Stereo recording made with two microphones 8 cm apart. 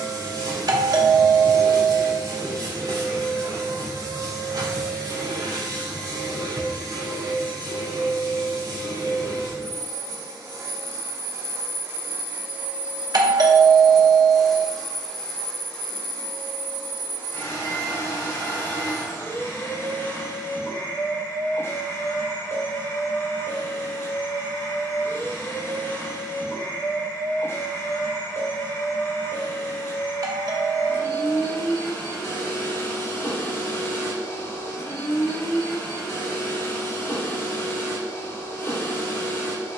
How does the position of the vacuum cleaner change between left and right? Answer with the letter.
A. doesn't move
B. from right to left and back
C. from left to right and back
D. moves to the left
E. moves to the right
D.